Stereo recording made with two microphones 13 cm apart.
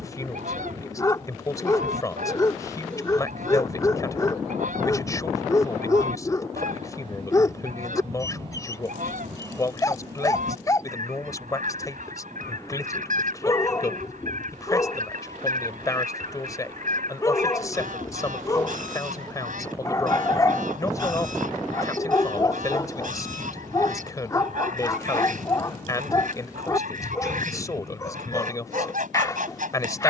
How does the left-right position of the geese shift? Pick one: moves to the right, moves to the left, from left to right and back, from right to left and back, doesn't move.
doesn't move.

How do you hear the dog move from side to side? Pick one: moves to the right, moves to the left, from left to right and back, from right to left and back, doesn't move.
doesn't move.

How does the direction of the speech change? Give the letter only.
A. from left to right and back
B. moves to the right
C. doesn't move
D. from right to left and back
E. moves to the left
C.